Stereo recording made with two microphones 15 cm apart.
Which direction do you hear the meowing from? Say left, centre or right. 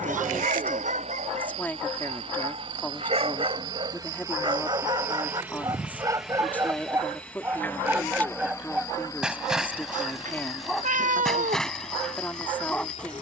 right.